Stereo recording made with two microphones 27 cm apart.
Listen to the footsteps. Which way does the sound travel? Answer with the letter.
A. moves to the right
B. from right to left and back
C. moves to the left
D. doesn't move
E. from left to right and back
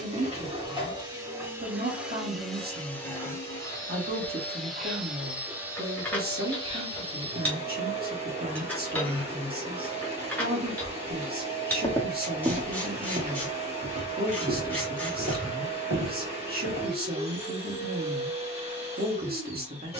A.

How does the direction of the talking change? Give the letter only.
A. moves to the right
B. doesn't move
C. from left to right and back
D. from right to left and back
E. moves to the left
B.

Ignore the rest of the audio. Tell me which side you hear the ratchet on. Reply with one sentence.
In this clip you hear the ratchet in the centre.